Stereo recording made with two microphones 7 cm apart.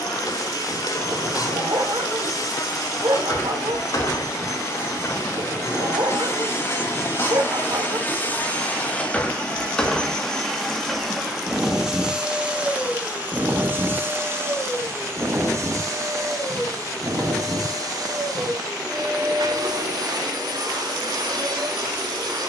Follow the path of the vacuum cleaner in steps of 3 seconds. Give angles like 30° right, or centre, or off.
50° left, 50° left, 30° left, 10° left, 30° right, 50° right, 60° right, 70° right.